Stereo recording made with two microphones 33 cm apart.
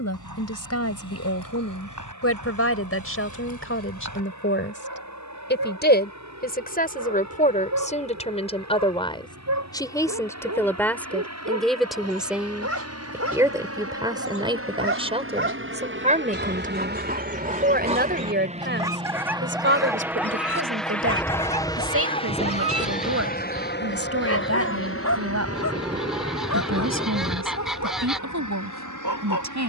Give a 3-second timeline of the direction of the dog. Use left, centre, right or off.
right, right, right, right, right, right, centre, left, left, left.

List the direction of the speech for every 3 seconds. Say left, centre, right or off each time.
left, left, left, centre, centre, right, right, right, right, right.